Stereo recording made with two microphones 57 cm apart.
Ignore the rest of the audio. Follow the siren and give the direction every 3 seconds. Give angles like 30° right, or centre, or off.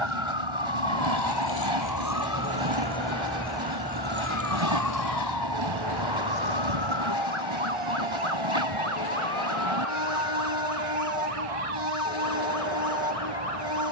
40° left, 20° right, 50° right, 60° right, 70° right.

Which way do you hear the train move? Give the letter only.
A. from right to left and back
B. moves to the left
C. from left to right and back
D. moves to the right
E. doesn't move
E.